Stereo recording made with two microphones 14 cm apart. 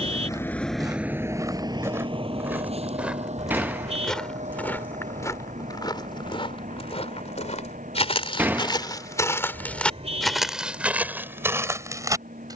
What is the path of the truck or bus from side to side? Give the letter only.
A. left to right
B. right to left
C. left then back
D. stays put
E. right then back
A.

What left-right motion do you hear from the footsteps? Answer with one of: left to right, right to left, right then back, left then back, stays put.
left then back.